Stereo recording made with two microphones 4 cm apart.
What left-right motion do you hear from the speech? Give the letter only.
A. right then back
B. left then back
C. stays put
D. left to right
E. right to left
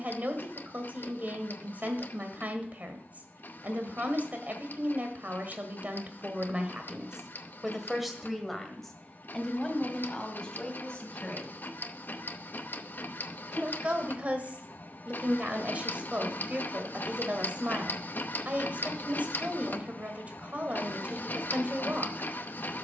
B.